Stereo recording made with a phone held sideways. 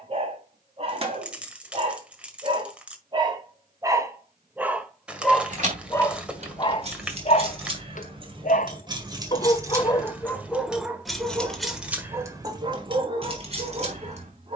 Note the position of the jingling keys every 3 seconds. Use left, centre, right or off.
off, right, right, centre, right.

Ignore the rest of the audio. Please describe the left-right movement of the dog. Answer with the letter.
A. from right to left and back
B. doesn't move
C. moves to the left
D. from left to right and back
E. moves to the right
A.